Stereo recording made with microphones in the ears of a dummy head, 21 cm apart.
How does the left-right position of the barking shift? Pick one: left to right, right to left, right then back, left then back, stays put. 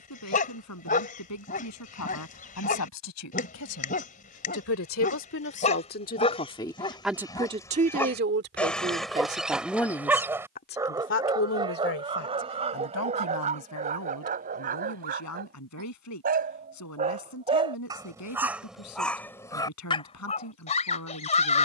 right then back.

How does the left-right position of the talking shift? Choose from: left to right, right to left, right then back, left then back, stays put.
right then back.